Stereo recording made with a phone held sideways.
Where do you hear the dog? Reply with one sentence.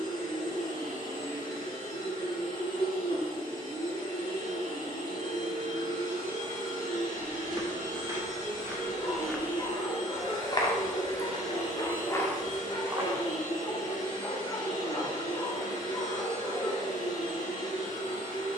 You can hear the dog on the left.